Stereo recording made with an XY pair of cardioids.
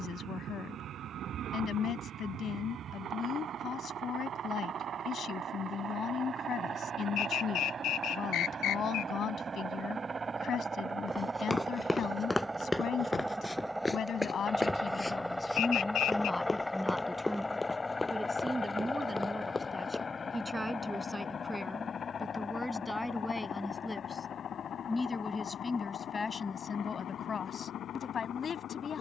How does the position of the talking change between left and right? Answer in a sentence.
You can hear the talking move from left to right and back again.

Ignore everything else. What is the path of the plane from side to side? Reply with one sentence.
You can hear the plane travel towards the left.